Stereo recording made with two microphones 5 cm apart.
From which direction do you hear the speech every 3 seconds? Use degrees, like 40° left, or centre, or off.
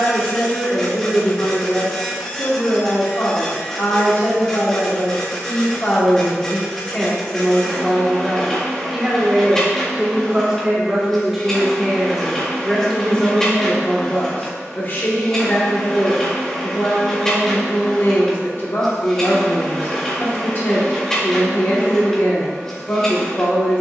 50° left, 50° left, 10° left, 10° right, 20° left, 50° left, 50° left, 50° left.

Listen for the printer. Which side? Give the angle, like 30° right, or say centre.
10° left.